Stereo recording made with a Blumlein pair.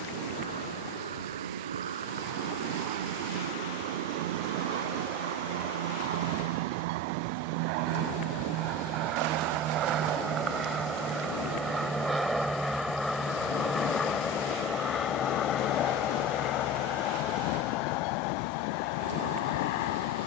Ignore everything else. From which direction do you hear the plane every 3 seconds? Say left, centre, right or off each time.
right, right, right, right, centre, left, left.